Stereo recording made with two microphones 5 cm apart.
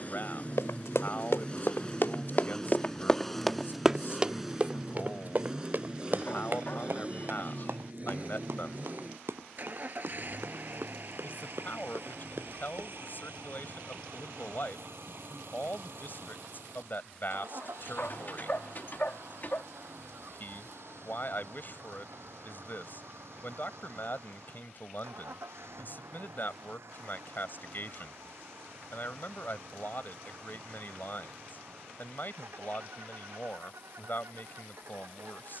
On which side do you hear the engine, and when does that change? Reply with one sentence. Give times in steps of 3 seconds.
In this clip you hear the engine on the left from 0 s, in the centre from 3 s and on the right from 6 s.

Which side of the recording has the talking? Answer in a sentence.
In this clip you hear the talking on the left.